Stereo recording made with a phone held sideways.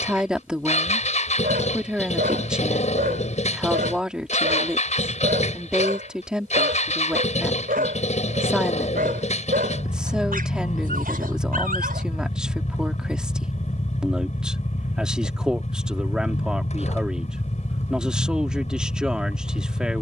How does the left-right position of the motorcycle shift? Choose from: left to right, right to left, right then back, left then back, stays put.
stays put.